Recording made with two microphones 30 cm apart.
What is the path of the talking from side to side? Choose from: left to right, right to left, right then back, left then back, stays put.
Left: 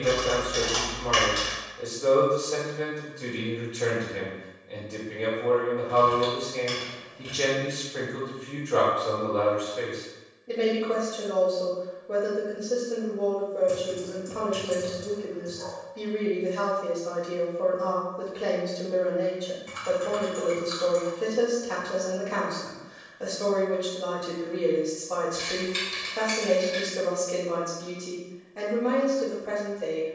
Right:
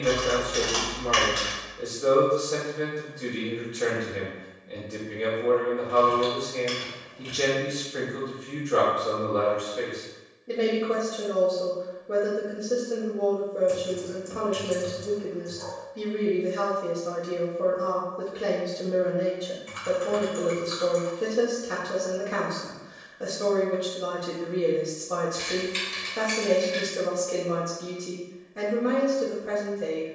stays put.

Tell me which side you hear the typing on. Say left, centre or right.
left.